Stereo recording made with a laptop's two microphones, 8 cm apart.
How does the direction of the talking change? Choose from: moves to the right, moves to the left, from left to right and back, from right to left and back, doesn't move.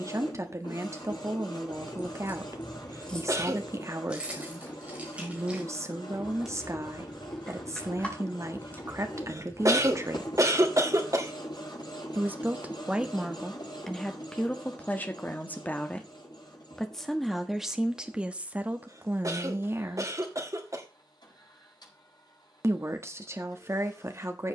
from right to left and back.